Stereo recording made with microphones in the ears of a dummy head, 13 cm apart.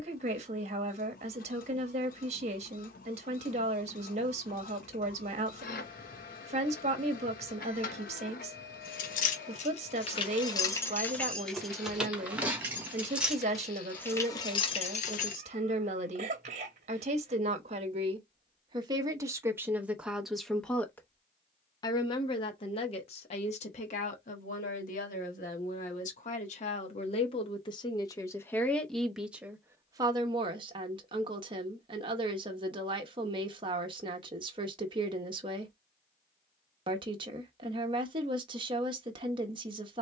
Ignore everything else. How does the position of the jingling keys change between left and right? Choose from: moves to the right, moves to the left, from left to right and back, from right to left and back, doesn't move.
from left to right and back.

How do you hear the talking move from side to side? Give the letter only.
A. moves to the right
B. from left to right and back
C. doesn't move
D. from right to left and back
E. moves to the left
D.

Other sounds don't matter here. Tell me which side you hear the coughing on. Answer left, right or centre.
right.